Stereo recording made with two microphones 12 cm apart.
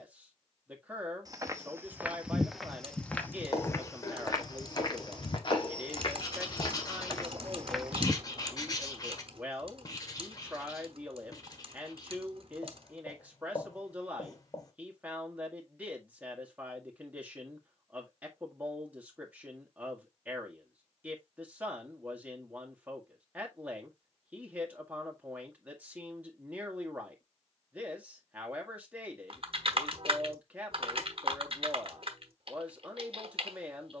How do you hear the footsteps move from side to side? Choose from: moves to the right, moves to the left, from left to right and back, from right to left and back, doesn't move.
from right to left and back.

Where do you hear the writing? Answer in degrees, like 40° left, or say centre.
30° left.